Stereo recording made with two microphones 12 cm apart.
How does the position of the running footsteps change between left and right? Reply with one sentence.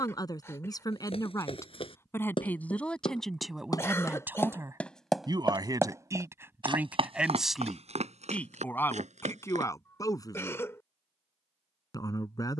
You can hear the running footsteps move from left to right.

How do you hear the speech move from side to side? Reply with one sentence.
In this clip you hear the speech move from left to right and back again.